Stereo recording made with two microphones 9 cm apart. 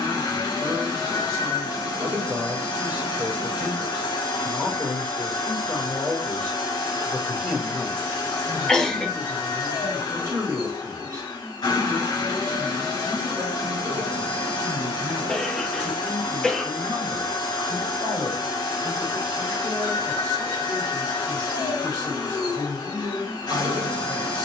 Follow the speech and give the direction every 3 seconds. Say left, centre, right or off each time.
right, centre, centre, right, right, right, right, right.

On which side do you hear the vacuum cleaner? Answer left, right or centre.
left.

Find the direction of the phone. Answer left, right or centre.
left.